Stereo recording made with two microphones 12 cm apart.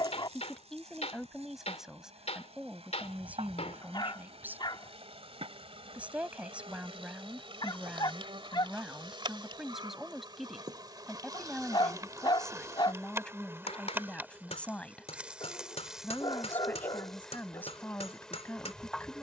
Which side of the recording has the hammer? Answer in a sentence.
In this clip you hear the hammer on the left.